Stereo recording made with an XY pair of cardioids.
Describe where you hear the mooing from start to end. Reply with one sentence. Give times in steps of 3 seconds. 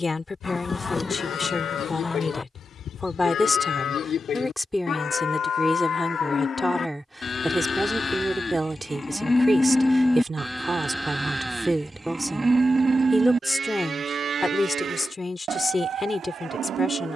In this clip you hear the mooing on the left from 0 s, in the centre from 9 s and on the right from 12 s.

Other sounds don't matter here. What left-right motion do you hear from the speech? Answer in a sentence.
You can hear the speech move from left to right and back again.